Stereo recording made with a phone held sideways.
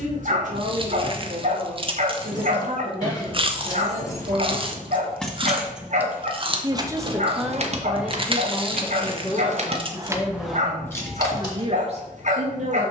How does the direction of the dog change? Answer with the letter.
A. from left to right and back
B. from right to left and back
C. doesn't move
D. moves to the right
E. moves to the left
C.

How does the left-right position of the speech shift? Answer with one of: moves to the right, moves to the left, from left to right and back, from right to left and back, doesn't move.
from right to left and back.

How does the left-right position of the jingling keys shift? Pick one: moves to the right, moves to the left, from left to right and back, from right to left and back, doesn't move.
from left to right and back.